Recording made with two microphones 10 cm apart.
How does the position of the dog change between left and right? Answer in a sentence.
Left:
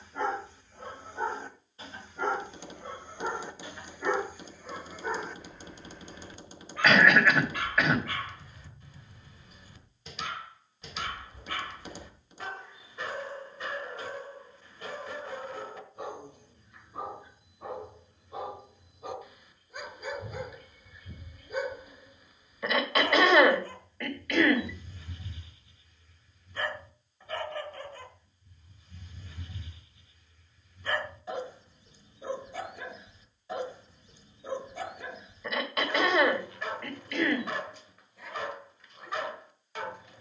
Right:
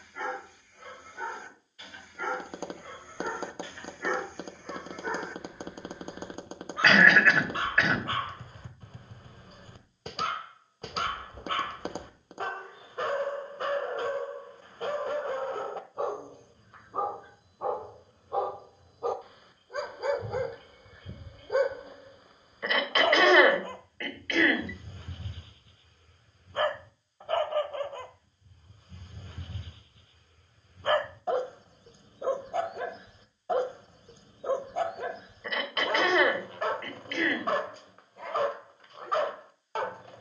In this clip you hear the dog travel towards the right.